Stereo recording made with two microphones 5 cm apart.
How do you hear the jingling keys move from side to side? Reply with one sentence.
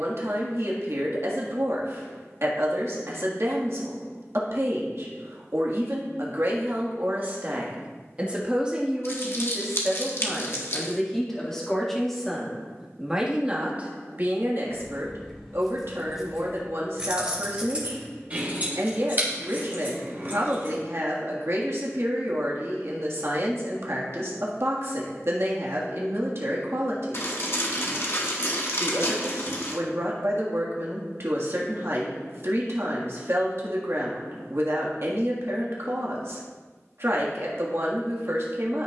In this clip you hear the jingling keys move from left to right.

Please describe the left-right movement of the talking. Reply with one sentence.
You can hear the talking go left and come back.